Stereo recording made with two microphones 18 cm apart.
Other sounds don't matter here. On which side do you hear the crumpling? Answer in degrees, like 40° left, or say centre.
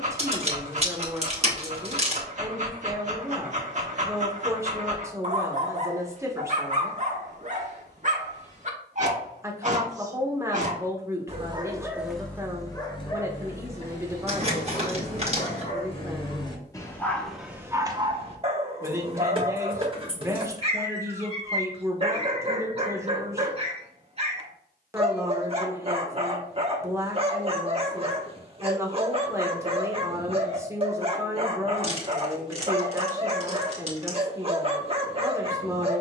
40° right.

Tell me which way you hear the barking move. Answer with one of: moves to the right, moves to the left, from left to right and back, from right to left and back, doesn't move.
from right to left and back.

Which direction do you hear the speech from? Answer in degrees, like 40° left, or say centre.
20° right.